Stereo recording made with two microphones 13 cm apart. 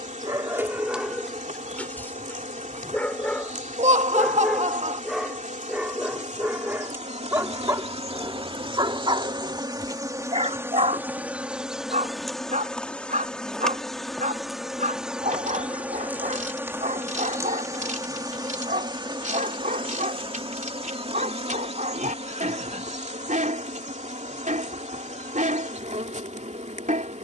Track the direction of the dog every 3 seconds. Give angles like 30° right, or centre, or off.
centre, centre, 20° right, 50° right, 70° right, 70° right, 70° right, 70° right, 70° right.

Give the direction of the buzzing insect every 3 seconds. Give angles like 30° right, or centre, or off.
70° right, 70° right, 50° right, 20° right, centre, 20° right, 40° right, 50° right, 60° right.